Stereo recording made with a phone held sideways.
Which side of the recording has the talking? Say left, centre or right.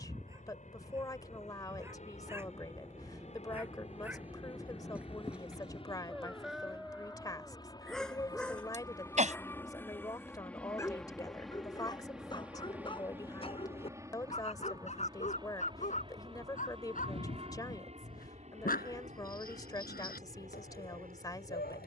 left.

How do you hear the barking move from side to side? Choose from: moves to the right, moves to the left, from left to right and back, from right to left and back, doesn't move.
moves to the left.